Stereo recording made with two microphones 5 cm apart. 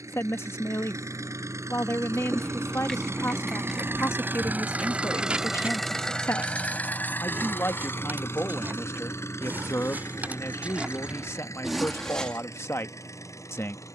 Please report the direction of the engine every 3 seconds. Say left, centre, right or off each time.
right, right, left, left, left.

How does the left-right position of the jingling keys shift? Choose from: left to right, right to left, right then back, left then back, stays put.
right then back.